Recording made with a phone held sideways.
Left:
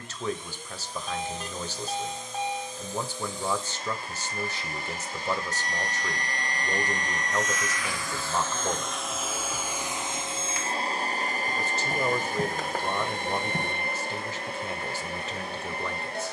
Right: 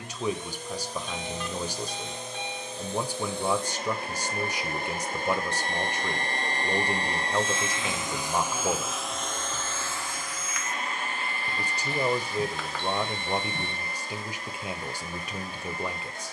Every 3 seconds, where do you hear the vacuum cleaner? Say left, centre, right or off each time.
right, right, right, left, left, left.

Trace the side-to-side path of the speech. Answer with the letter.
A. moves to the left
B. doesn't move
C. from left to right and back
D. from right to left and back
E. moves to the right
B.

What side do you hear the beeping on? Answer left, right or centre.
left.